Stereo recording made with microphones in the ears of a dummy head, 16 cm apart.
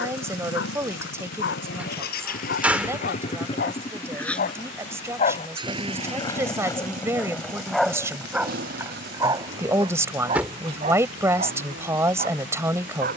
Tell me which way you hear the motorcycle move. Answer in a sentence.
You can hear the motorcycle move from left to right.